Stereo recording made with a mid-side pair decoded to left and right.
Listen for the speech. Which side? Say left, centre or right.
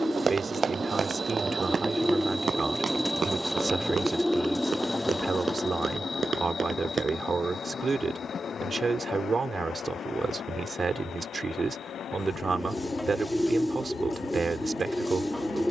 right.